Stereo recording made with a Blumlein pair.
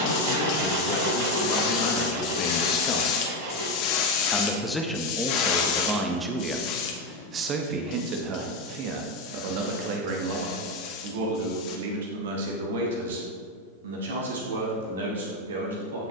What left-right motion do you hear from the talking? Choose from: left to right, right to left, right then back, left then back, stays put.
left to right.